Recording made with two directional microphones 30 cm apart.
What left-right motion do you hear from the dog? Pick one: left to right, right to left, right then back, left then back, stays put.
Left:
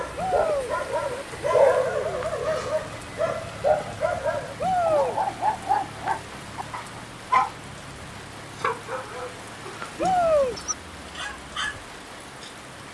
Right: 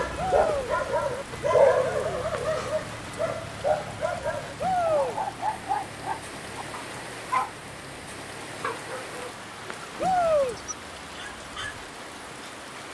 right to left.